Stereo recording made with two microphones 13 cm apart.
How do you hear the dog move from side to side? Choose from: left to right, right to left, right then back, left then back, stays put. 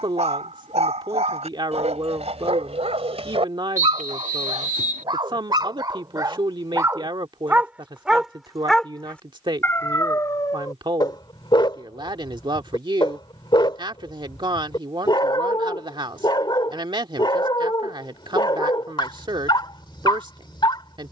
right to left.